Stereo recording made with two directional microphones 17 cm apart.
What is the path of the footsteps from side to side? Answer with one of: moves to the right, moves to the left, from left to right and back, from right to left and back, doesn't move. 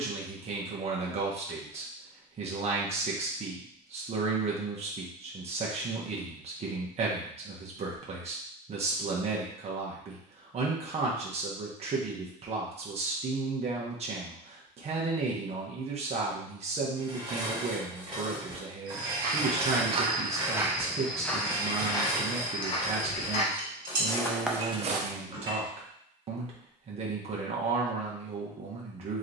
from right to left and back.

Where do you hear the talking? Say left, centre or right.
right.